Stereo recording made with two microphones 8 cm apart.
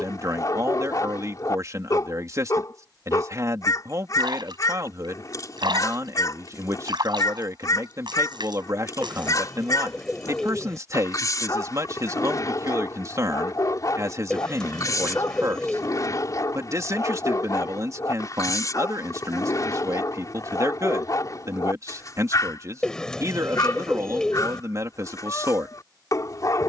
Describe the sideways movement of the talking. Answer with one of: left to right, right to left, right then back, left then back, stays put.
stays put.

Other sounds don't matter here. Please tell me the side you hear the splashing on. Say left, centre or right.
right.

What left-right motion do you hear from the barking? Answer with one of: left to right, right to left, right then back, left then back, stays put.
stays put.